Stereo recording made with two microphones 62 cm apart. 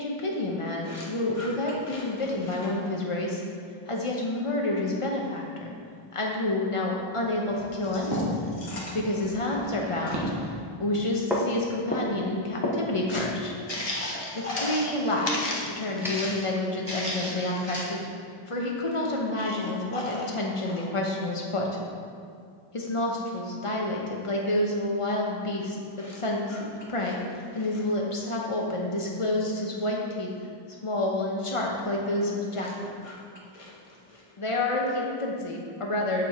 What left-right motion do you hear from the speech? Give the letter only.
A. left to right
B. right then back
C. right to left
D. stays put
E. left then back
D.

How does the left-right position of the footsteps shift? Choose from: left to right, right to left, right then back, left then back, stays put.
left then back.